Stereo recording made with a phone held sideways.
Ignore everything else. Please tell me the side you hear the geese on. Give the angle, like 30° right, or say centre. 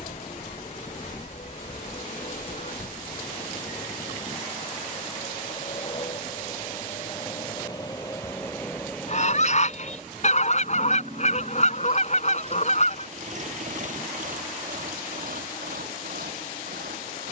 50° left.